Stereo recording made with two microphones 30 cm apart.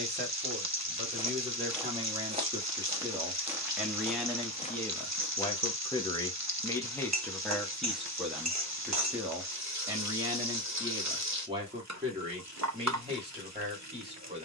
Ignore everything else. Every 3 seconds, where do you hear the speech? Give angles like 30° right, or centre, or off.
20° right, centre, centre, 10° right, 20° right.